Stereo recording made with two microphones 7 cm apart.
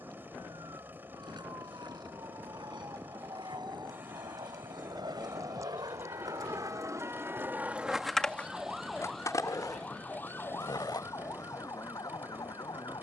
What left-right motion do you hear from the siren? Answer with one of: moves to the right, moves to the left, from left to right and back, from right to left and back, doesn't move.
moves to the left.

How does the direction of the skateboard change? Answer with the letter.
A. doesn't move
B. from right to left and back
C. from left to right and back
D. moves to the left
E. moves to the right
D.